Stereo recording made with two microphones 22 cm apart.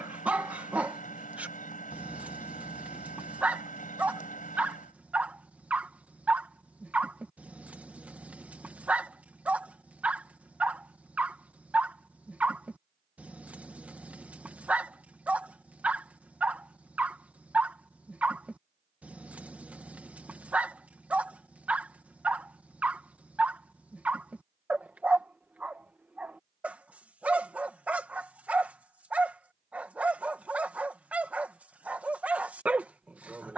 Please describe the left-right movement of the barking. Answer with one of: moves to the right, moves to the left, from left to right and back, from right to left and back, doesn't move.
doesn't move.